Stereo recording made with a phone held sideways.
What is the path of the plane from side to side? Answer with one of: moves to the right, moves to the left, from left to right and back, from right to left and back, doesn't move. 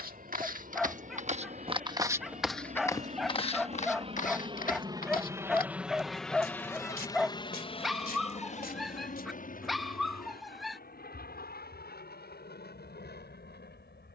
moves to the left.